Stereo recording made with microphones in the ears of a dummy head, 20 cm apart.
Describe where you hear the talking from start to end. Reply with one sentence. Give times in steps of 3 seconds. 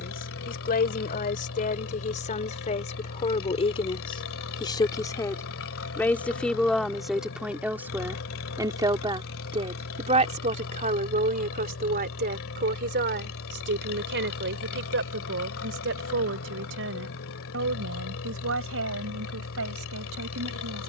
You can hear the talking on the left from 0 s, in the centre from 6 s and on the right from 9 s.